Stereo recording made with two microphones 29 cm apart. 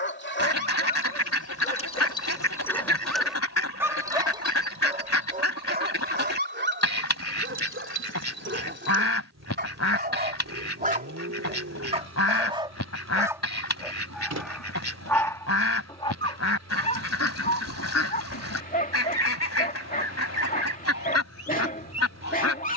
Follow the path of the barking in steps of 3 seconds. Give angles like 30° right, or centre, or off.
20° left, 20° right, 40° right, 30° right, 10° right, 20° left, 30° left, 30° left.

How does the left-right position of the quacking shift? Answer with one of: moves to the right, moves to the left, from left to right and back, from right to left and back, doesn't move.
doesn't move.